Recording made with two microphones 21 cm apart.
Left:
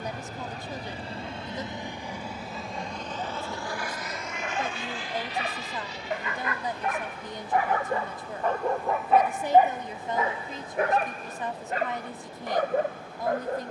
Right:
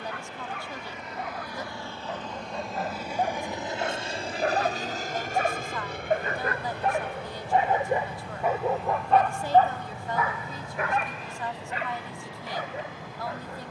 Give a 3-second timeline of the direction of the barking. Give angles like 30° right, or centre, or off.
70° right, 60° right, 30° right, 30° left, 60° left.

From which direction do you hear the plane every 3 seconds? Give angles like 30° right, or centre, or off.
20° left, 30° right, 60° right, 70° right, 70° right.